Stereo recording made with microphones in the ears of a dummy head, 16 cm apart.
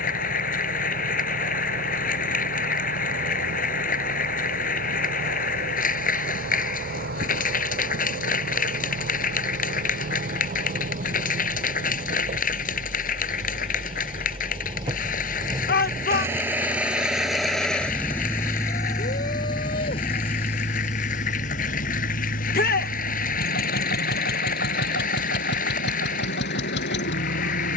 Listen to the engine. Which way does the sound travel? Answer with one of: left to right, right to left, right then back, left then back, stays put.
right to left.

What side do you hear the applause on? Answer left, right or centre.
left.